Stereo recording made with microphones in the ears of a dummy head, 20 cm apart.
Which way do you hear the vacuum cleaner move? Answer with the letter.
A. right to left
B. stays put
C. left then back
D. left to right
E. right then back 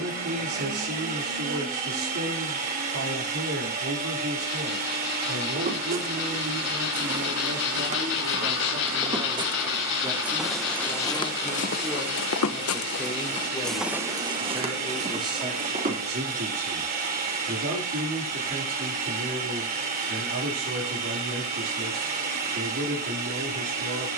B.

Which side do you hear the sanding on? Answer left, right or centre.
left.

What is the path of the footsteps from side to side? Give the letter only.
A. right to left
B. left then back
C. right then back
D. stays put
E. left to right
B.